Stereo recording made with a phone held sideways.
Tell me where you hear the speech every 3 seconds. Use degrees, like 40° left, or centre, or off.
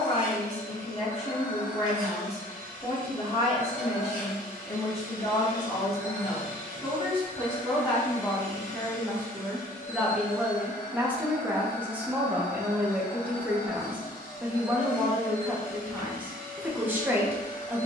40° left, 40° left, 30° left, centre, 10° right, 10° right.